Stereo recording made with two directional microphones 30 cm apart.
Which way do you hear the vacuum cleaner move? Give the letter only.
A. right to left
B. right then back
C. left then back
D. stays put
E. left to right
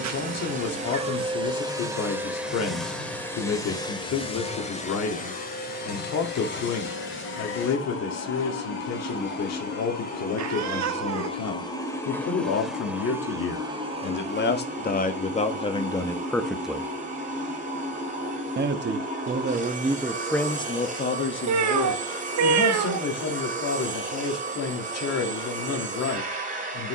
C.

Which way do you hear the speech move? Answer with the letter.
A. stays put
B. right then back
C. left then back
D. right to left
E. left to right
B.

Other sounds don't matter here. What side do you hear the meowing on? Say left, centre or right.
right.